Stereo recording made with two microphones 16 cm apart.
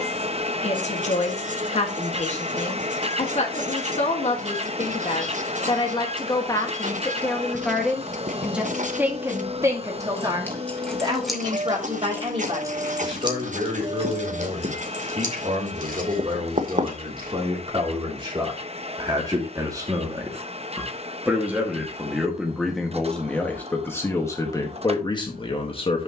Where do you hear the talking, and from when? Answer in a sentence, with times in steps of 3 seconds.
In this clip you hear the talking on the left from 0 s, in the centre from 6 s, on the right from 9 s, in the centre from 21 s and on the left from 24 s.